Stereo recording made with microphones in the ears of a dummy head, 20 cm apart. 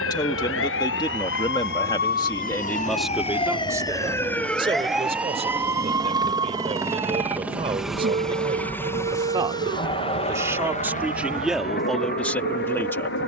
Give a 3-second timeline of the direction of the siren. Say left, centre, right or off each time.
left, centre, right, right, right.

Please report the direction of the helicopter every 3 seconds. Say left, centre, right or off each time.
right, right, centre, left, left.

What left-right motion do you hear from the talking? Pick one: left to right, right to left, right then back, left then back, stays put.
right then back.